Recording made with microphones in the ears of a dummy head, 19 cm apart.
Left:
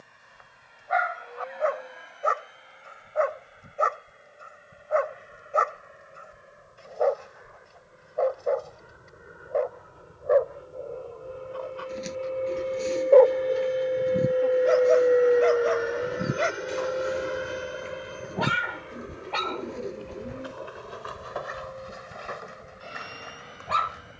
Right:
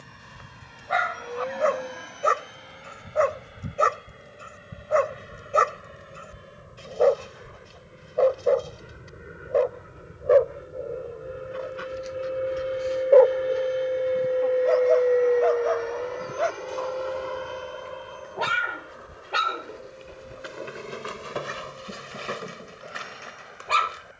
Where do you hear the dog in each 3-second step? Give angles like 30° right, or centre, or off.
50° right, 50° right, 50° right, 30° right, 10° left, 30° left, 20° right, 40° right.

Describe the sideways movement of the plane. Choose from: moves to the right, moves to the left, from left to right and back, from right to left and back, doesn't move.
moves to the left.